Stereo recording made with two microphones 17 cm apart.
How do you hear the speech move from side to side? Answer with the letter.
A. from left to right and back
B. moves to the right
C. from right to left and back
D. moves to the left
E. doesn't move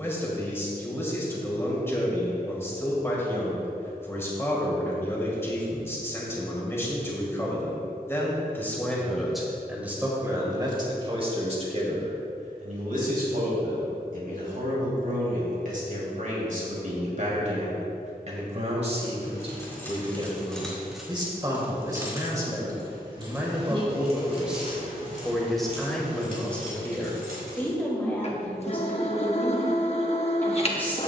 A.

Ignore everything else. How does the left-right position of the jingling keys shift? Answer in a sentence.
You can hear the jingling keys go from the left side to the right.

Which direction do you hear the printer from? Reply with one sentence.
You can hear the printer on the left.